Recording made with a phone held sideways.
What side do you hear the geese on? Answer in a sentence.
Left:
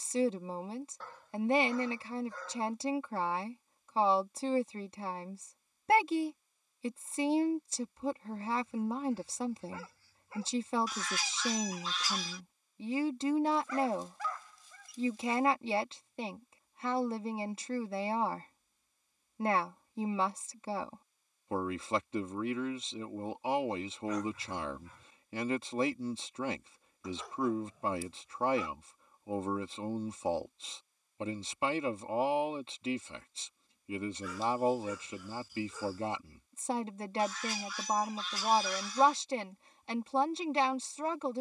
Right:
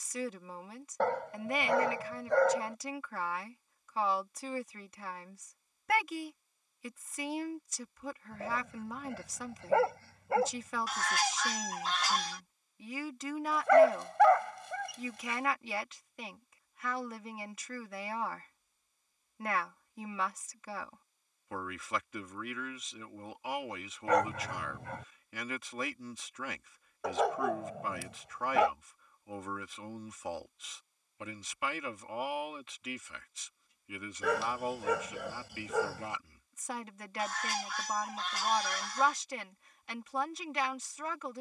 You can hear the geese on the right.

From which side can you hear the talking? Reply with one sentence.
In this clip you hear the talking on the left.